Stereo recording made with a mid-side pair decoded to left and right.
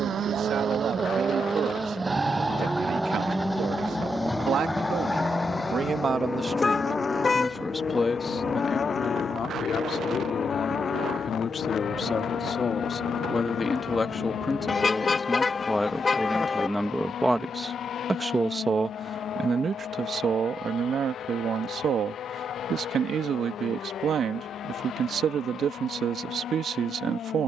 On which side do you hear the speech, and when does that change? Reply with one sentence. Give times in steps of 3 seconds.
In this clip you hear the speech on the right from 0 s, in the centre from 6 s, on the left from 9 s, in the centre from 15 s and on the right from 18 s.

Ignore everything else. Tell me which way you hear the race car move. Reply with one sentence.
You can hear the race car move from right to left.